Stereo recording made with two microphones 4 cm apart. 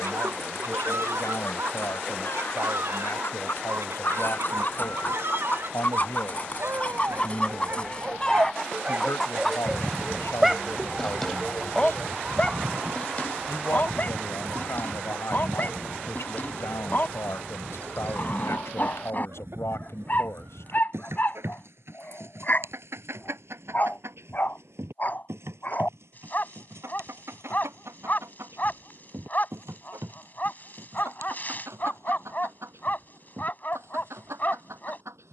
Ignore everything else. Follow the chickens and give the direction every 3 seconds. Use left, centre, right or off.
left, left, left, centre, right, right, right, right, right, right, right, right.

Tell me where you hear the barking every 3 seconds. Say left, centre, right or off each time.
right, right, right, centre, left, left, left, left, left, left, left, left.